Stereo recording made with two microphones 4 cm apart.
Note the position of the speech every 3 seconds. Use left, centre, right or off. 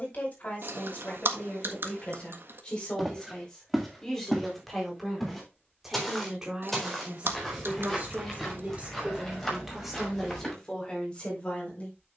left, centre, right, centre.